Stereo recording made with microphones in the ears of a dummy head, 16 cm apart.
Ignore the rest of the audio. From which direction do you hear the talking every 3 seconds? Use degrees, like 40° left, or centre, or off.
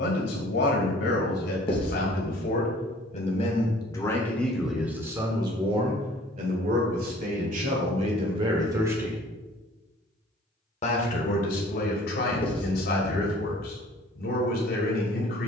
60° left, centre, 40° right, 40° left, 60° left.